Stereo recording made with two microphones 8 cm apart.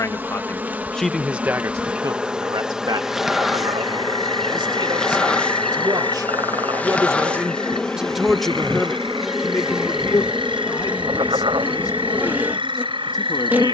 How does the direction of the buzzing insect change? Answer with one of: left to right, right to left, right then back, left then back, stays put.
left then back.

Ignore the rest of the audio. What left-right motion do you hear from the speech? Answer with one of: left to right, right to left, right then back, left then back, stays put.
right then back.